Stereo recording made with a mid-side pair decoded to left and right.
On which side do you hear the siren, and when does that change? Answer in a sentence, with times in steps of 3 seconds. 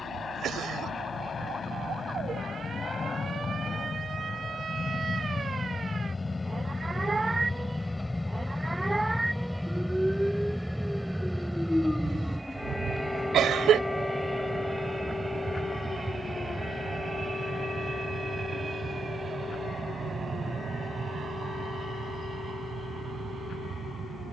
You can hear the siren on the right from 0 s, in the centre from 9 s and on the left from 12 s.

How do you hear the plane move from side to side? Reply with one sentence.
In this clip you hear the plane travel towards the right.